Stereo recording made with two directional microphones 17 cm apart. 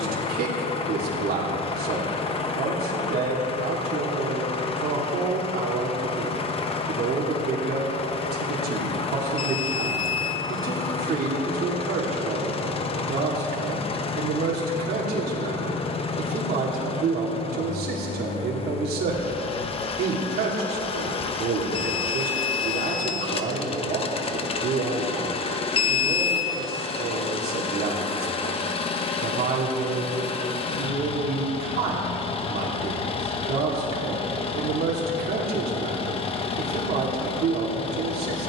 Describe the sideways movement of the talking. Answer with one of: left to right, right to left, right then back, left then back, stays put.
stays put.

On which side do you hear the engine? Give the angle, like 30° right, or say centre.
30° left.